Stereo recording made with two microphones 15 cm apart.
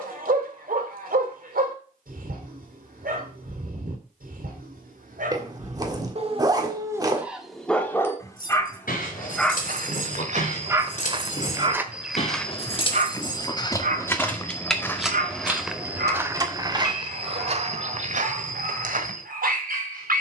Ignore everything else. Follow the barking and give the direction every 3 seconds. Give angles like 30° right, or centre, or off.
80° right, 70° right, 10° right, 20° right, 60° right, 80° right, 80° right.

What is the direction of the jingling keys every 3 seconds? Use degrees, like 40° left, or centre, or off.
off, off, 70° left, 60° left, 20° left, 20° right, off.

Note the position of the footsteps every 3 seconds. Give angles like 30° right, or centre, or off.
off, off, off, 50° right, 20° left, 20° right, 60° right.